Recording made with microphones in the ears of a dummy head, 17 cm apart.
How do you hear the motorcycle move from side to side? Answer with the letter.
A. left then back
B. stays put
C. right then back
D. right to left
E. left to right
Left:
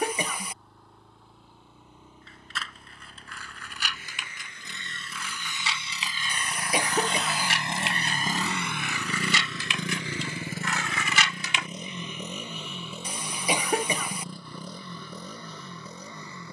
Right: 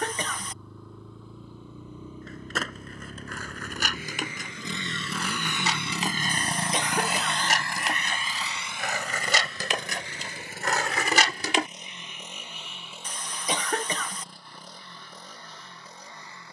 D.